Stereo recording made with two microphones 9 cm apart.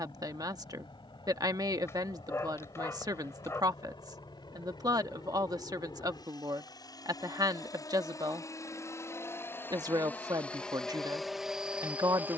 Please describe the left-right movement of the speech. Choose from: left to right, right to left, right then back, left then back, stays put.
stays put.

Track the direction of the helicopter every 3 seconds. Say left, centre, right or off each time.
left, left, left, centre.